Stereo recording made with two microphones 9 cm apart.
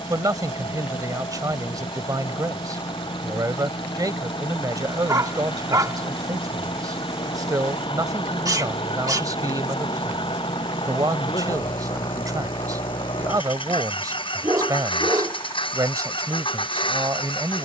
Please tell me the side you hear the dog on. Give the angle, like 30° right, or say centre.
40° right.